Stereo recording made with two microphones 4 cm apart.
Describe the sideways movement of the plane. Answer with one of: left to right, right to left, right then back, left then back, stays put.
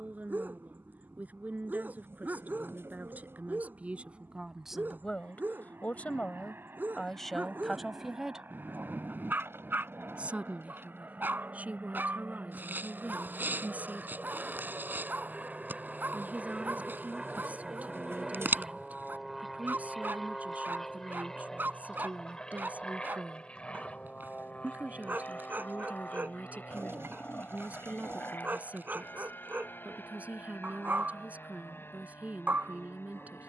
right to left.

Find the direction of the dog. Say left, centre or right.
right.